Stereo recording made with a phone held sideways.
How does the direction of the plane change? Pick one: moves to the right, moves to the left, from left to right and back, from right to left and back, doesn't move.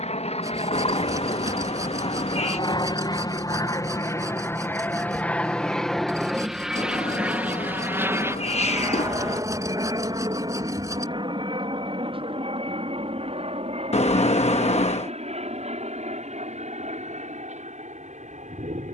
moves to the right.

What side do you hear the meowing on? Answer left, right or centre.
left.